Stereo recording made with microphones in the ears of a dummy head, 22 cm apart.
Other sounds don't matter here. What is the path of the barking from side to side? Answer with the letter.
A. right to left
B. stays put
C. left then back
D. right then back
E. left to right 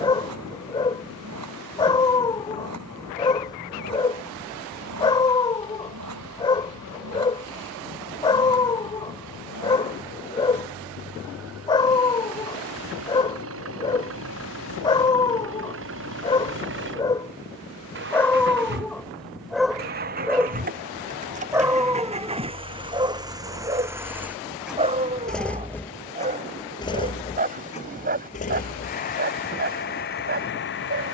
E.